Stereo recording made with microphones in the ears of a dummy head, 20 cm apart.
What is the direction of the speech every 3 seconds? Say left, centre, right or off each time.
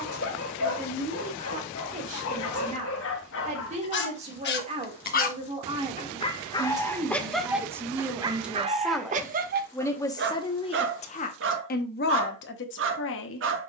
right, right, centre, left, left.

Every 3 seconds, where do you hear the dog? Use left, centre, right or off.
left, left, centre, right, right.